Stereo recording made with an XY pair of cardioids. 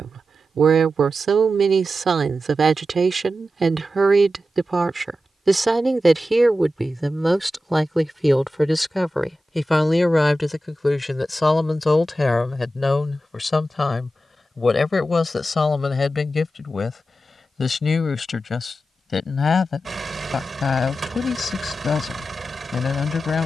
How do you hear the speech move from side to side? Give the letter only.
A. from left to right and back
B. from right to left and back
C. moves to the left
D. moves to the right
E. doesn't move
C.